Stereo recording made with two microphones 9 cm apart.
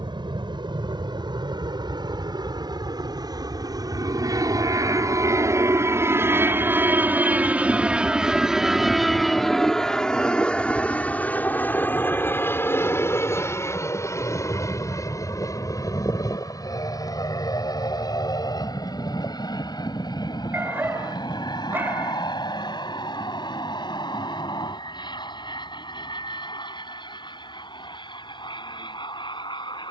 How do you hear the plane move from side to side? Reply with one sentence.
In this clip you hear the plane go from the right side to the left.